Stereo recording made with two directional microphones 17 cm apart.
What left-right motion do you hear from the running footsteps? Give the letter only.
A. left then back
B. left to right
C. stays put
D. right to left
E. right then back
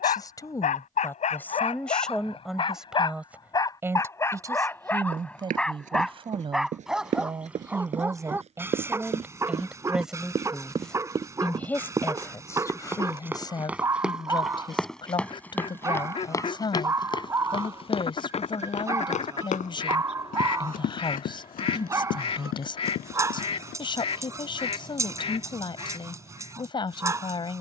D.